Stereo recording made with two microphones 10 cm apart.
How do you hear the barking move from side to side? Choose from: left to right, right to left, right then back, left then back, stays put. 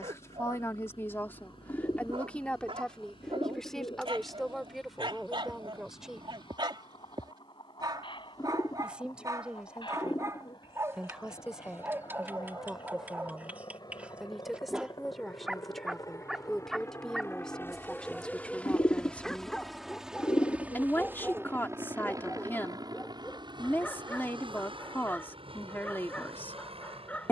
right to left.